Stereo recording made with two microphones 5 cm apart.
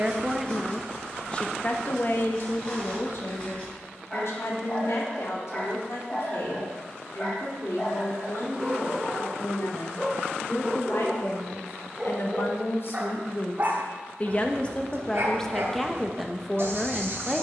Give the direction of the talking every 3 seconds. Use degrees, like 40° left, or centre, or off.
30° left, 70° left, 70° left, 70° left, 40° left, centre.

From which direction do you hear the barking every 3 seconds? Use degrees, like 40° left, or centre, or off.
20° left, 20° left, 20° left, centre, 40° right, 60° right.